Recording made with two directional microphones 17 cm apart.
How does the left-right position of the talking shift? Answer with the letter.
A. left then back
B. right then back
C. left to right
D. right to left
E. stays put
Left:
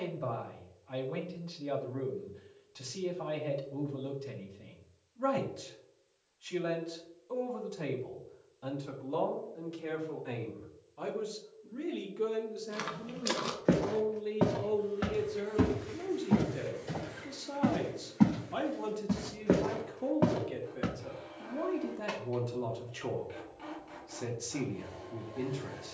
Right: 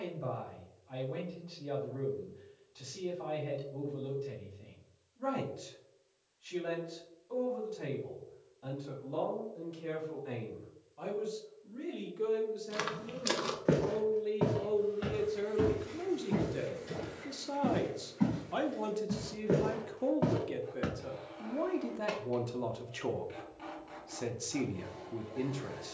C.